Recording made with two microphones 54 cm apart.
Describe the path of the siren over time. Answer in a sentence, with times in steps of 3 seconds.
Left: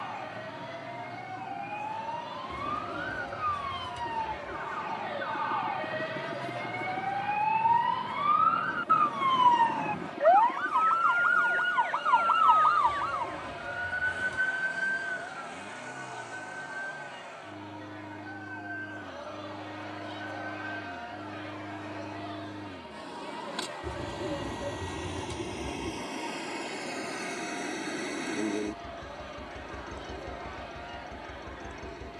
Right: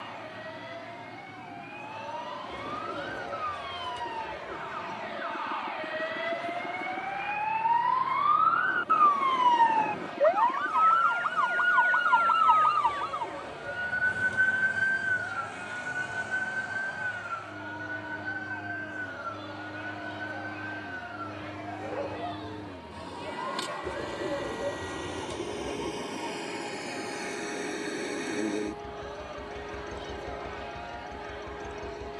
You can hear the siren on the left from 0 s, in the centre from 9 s and on the right from 12 s.